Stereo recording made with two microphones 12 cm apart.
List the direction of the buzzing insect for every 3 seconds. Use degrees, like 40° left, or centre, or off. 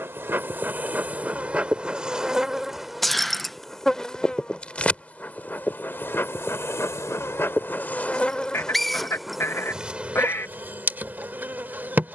10° right, 10° left, 20° left, 10° right.